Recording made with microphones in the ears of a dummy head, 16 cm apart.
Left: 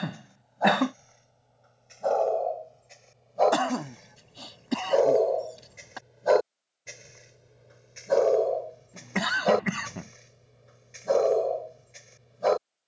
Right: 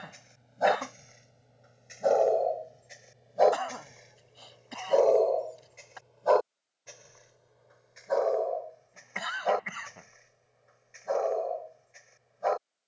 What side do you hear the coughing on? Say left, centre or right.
left.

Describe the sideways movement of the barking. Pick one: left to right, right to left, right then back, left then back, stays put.
right to left.